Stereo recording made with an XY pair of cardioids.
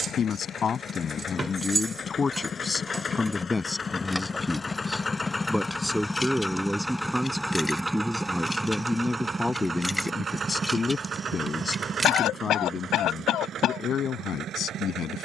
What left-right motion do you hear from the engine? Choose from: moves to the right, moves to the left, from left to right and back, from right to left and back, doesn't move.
moves to the right.